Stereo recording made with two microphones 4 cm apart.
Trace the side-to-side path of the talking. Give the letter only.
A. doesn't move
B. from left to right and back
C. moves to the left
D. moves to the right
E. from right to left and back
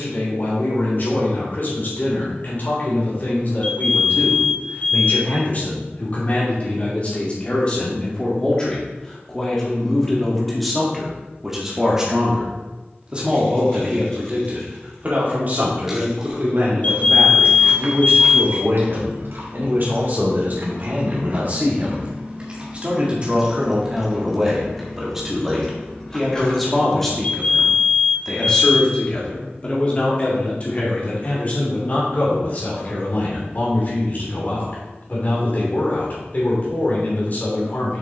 B.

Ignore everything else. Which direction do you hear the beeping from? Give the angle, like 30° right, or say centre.
40° left.